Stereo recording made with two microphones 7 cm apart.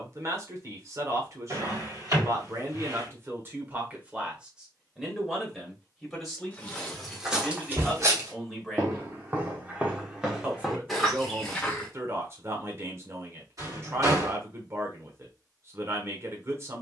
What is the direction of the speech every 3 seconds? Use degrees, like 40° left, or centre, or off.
40° right, 20° right, centre, 30° right, 40° right, 40° right.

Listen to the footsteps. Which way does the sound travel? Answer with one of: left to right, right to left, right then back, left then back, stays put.
right then back.